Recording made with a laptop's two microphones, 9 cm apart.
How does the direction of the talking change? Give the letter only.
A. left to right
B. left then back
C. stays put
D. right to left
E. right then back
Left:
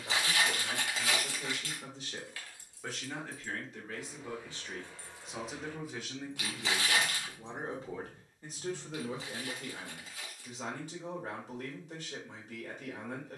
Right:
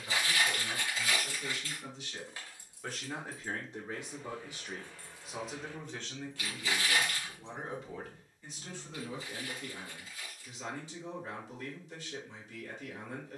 E.